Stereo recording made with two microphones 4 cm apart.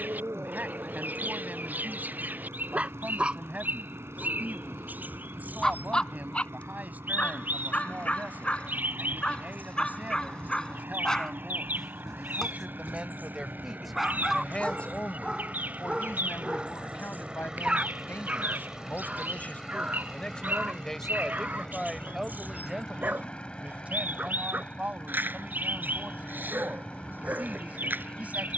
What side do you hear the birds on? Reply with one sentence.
You can hear the birds on the right.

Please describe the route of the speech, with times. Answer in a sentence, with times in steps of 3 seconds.
In this clip you hear the speech on the right from 0 s, in the centre from 12 s, on the left from 15 s, in the centre from 21 s and on the right from 24 s.